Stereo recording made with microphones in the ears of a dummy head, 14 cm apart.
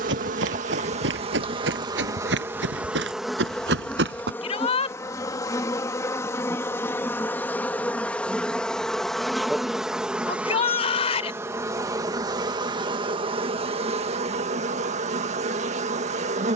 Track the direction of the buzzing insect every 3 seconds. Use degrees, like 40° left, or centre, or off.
30° right, 10° left, 10° left, 10° right, 40° right, 50° right.